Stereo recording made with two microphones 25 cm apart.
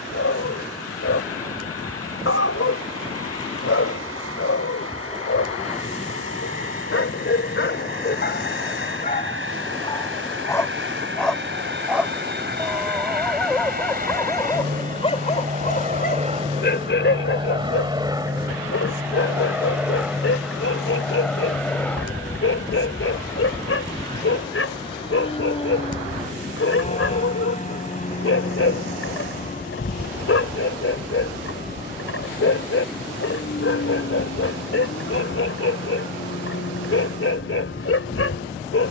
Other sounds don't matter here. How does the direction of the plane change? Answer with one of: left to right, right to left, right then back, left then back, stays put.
right to left.